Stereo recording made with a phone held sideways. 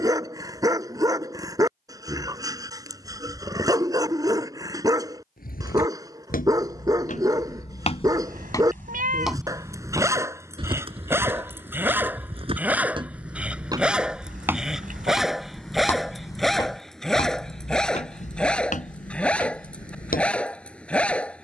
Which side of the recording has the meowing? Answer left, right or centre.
right.